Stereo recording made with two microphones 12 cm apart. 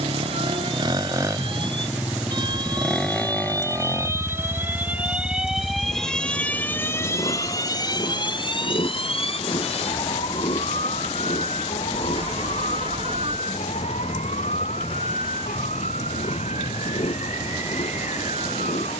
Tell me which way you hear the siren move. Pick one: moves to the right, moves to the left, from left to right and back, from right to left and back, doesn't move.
moves to the left.